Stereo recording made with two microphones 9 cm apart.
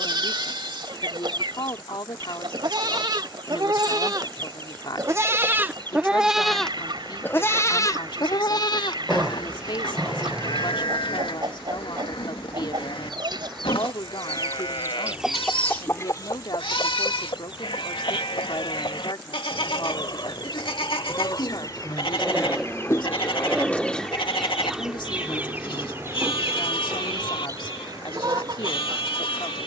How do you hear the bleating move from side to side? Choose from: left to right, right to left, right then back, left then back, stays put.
right to left.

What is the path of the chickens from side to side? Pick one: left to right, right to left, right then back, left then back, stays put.
left then back.